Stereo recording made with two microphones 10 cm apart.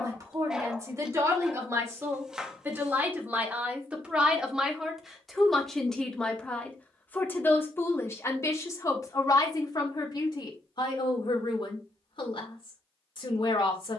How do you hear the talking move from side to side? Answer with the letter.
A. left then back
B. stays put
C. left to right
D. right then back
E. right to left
E.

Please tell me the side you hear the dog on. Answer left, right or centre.
centre.